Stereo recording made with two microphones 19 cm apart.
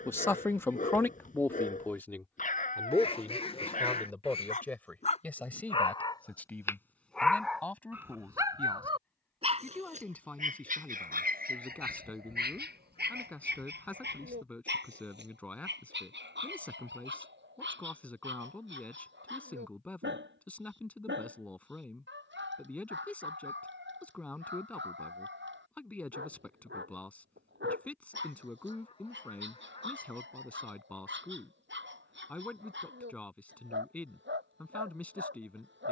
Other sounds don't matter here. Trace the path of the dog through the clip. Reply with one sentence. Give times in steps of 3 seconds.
You can hear the dog on the left from 0 s, in the centre from 6 s and on the right from 9 s.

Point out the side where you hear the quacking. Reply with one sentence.
You can hear the quacking on the left.